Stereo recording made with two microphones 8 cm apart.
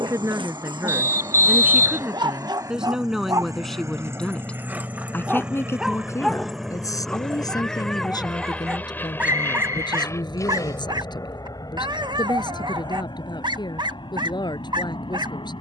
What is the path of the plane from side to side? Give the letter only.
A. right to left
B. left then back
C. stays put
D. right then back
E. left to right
A.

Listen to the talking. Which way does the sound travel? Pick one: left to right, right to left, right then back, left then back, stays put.
right to left.